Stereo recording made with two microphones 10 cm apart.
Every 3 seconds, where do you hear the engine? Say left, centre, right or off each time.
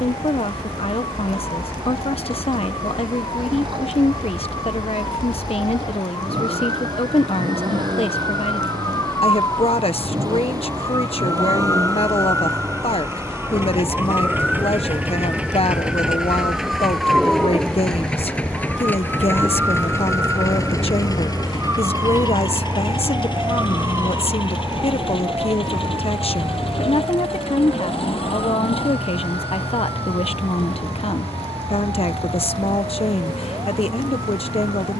right, right, right, right, right, centre, left, left, left, left, left, left.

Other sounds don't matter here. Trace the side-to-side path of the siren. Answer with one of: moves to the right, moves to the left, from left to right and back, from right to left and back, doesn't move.
moves to the right.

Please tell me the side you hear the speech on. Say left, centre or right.
left.